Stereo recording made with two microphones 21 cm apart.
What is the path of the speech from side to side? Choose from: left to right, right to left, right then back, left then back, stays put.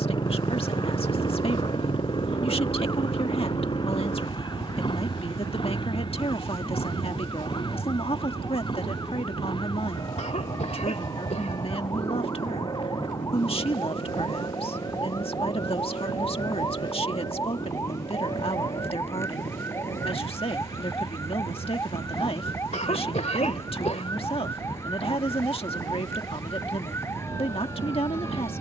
stays put.